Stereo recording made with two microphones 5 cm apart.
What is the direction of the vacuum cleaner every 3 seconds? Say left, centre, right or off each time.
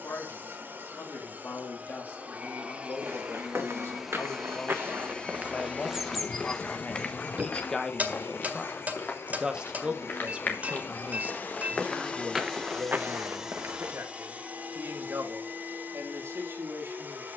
right, centre, left, left, centre, right.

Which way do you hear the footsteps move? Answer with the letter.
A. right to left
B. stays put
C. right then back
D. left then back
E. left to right
D.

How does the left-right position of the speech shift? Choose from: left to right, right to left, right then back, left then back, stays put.
left to right.